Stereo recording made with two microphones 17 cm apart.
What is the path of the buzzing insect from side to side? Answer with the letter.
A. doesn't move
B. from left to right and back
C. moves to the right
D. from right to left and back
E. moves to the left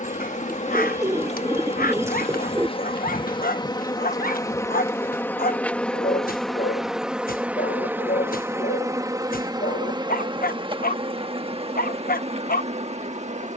C.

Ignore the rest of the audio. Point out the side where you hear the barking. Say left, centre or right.
left.